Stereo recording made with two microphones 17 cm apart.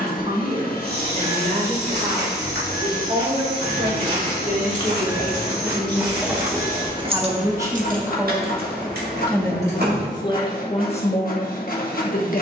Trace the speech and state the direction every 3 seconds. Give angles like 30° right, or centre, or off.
50° right, 40° right, 20° right, 30° left.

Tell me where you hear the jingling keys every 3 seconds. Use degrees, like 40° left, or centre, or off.
off, 30° left, 40° right, 80° right.